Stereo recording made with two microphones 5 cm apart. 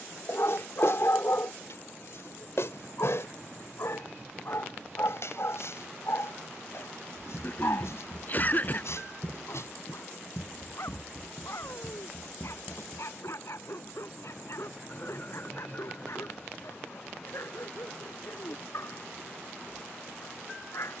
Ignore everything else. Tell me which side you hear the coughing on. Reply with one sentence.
In this clip you hear the coughing on the left.